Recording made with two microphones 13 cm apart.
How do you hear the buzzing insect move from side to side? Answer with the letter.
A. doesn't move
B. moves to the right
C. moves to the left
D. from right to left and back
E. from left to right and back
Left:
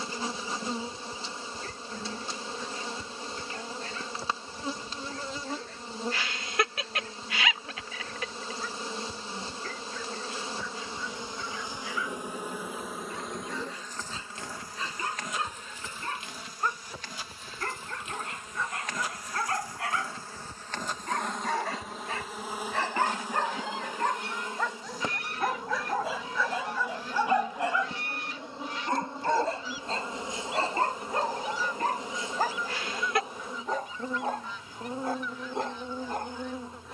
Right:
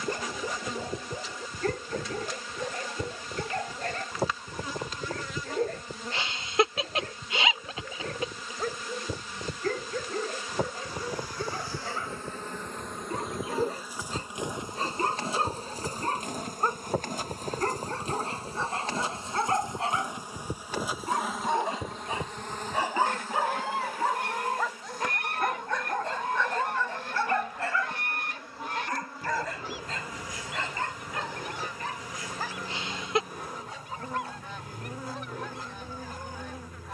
E.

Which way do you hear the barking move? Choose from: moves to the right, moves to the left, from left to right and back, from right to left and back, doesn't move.
moves to the left.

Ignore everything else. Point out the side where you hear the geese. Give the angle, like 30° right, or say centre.
60° right.